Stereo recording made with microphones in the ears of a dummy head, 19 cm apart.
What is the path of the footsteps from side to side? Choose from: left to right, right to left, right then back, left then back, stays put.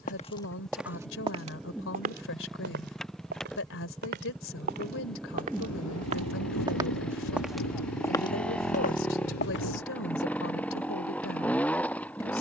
right then back.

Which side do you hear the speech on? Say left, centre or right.
left.